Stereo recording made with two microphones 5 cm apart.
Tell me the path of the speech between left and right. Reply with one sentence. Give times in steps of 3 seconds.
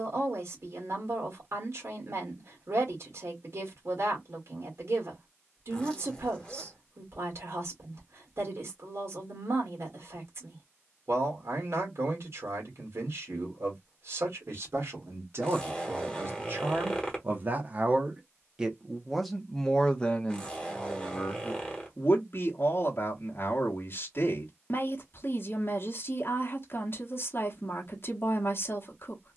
In this clip you hear the speech on the right from 0 s, in the centre from 18 s and on the left from 21 s.